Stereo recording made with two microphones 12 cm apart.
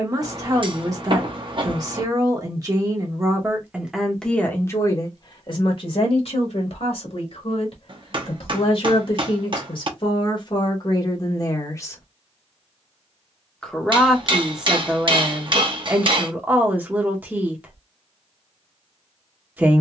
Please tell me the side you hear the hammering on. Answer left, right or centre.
right.